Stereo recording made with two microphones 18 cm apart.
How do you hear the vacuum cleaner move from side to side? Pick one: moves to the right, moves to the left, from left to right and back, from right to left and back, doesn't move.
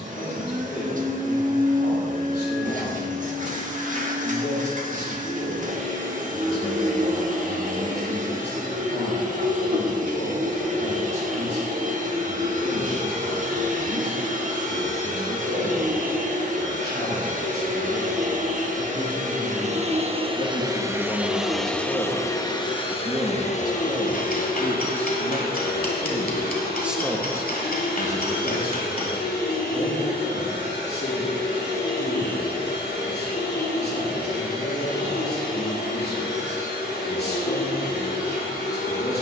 moves to the left.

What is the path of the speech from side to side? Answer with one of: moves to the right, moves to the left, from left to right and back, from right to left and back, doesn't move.
from left to right and back.